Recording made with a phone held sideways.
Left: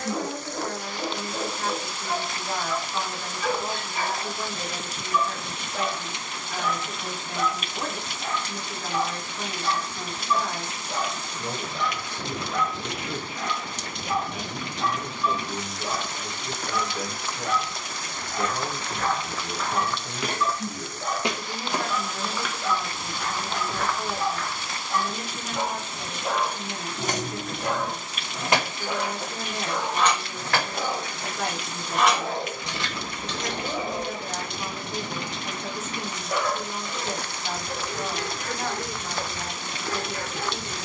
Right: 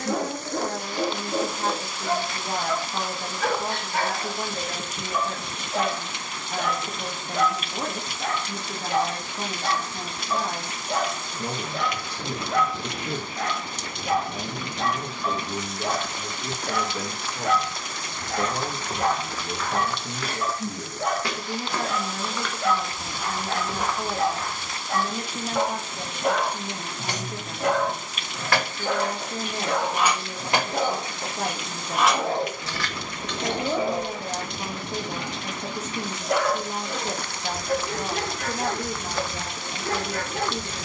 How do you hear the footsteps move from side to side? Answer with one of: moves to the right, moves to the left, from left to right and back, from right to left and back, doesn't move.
from right to left and back.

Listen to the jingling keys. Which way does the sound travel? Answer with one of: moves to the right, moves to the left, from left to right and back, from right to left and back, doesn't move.
from left to right and back.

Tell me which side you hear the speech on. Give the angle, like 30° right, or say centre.
30° right.